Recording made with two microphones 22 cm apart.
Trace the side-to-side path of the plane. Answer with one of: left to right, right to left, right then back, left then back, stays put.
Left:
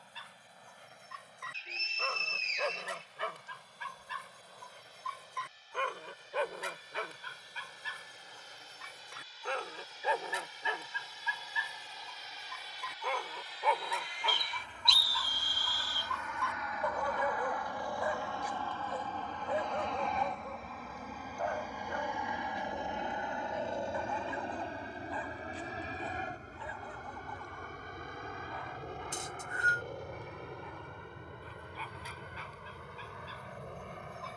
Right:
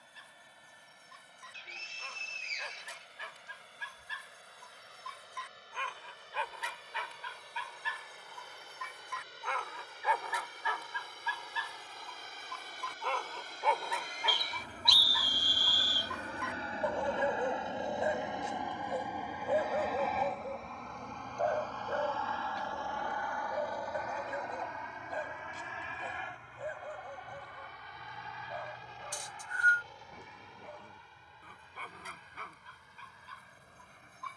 right to left.